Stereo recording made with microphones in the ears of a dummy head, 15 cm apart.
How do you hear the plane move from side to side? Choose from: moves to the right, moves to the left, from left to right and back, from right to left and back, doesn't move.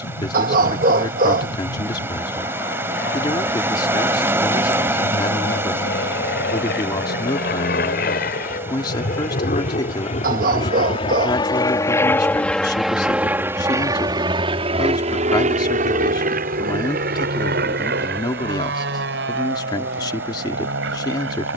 moves to the right.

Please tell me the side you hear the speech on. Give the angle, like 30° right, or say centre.
20° left.